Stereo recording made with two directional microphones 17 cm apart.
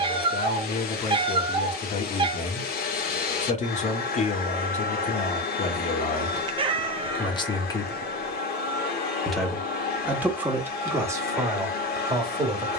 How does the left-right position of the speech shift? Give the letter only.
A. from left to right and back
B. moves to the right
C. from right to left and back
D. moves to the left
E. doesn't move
B.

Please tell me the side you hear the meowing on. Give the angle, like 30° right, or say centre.
30° right.